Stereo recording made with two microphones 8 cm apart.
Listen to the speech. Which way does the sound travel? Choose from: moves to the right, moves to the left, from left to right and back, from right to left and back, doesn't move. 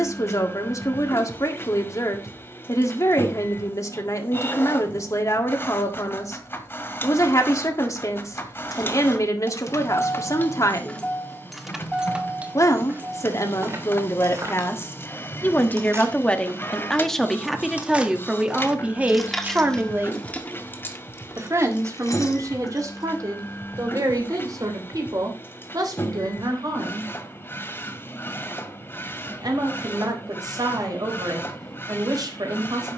moves to the right.